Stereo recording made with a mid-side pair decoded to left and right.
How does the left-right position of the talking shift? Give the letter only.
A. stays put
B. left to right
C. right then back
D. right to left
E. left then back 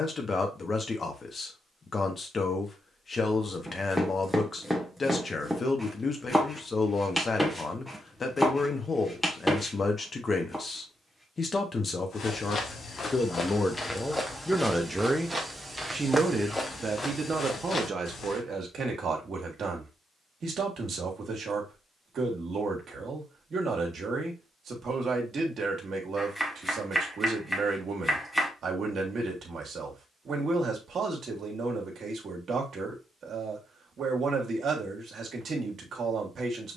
B.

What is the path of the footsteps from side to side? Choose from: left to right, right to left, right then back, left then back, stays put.
right then back.